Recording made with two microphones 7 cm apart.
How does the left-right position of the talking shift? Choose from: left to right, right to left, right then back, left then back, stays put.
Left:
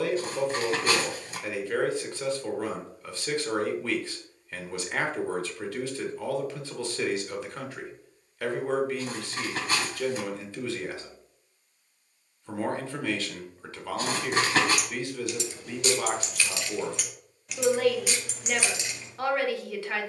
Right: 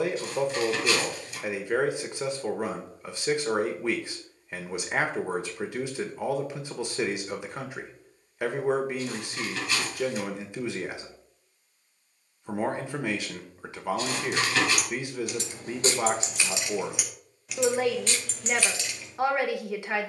stays put.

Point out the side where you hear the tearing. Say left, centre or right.
left.